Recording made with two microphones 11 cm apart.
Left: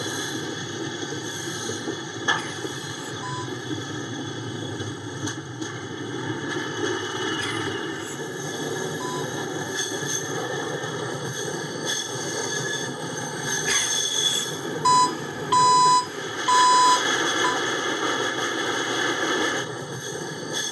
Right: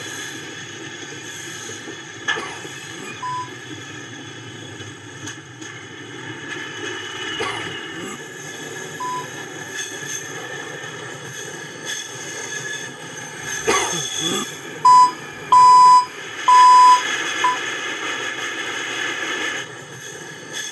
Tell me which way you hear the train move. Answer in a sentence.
In this clip you hear the train stay put.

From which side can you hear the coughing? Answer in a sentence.
You can hear the coughing on the right.